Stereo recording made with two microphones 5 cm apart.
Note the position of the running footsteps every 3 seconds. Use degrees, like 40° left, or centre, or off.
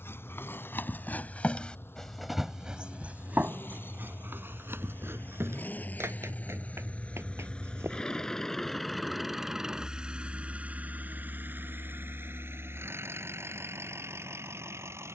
30° left, 50° right, 70° right, off, off.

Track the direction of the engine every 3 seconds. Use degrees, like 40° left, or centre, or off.
60° left, 50° left, 20° left, 30° right, 70° right.